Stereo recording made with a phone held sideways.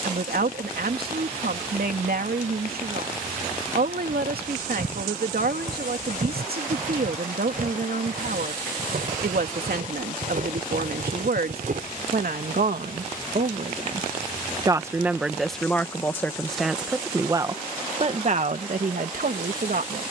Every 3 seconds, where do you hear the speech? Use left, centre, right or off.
right, right, right, right, right, centre, right.